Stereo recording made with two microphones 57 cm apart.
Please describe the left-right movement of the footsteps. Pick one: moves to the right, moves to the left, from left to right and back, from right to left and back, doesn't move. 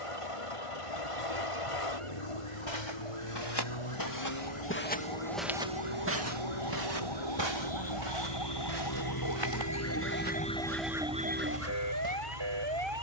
moves to the right.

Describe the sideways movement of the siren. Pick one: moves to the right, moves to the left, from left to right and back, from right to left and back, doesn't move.
moves to the right.